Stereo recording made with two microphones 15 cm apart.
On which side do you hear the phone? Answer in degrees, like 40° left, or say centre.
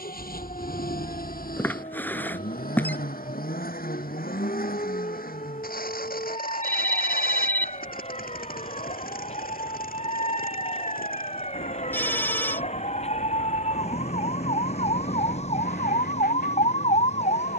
10° left.